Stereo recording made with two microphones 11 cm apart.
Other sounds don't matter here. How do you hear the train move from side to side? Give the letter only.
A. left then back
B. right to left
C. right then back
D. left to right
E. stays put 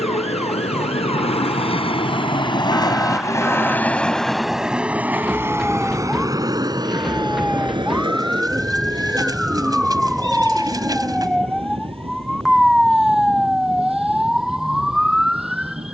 D.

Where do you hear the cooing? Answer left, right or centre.
right.